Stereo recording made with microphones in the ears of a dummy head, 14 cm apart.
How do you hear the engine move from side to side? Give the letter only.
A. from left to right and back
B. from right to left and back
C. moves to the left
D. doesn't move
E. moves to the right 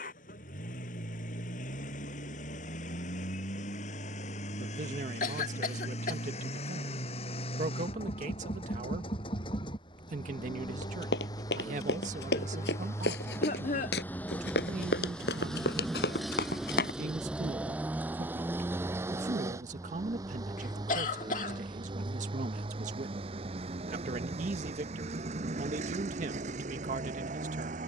E.